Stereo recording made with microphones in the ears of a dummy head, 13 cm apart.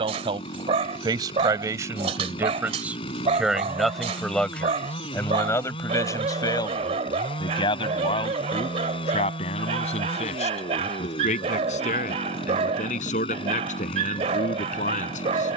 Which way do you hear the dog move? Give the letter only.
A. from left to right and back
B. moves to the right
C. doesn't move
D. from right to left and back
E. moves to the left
C.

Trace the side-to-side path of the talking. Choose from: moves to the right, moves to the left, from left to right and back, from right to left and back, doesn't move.
moves to the left.